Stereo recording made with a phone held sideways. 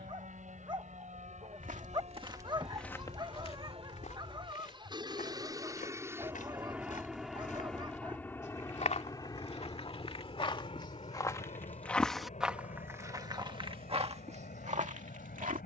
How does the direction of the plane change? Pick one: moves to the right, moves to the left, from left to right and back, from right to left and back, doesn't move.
moves to the left.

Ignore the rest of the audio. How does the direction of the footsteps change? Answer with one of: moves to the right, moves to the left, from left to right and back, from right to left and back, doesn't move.
from right to left and back.